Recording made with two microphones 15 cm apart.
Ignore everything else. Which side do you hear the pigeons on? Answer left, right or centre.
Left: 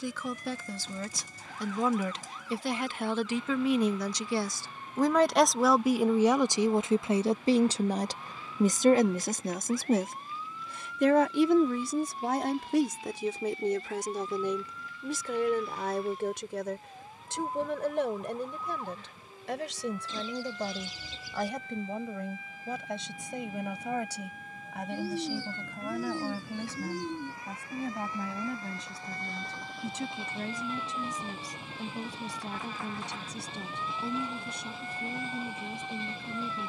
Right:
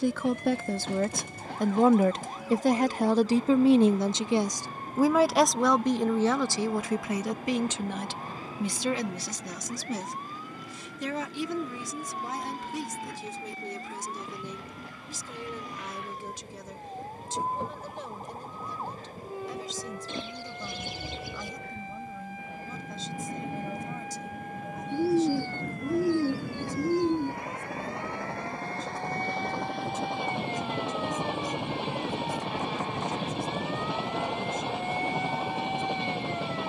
right.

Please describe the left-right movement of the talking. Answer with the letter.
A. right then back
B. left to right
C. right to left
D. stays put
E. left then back
C.